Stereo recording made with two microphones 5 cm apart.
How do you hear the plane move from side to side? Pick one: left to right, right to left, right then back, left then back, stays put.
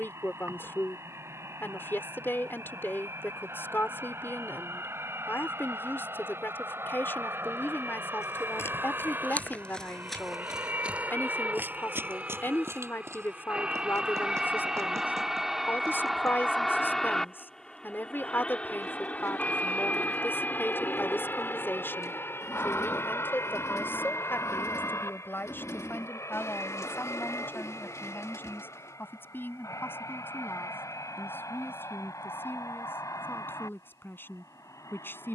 right to left.